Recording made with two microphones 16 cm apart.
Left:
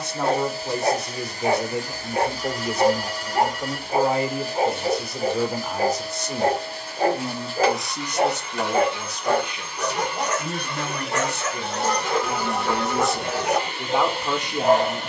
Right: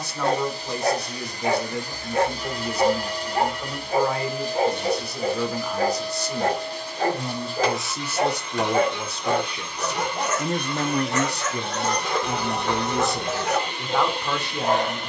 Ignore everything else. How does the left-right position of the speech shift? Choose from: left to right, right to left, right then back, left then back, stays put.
right then back.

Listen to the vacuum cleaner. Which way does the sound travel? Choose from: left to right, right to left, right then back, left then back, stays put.
stays put.